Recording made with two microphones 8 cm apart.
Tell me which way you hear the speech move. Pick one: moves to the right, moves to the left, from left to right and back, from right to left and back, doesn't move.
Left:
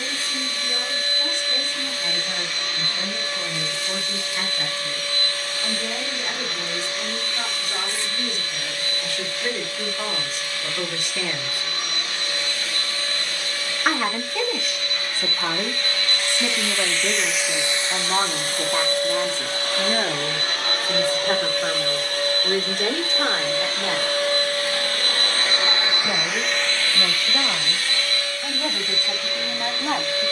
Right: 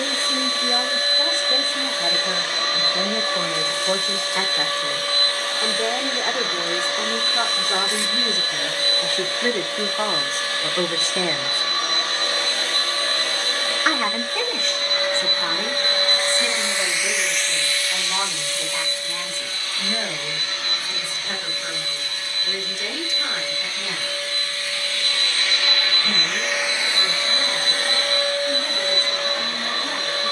moves to the left.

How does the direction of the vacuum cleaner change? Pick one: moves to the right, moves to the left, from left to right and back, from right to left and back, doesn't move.
from right to left and back.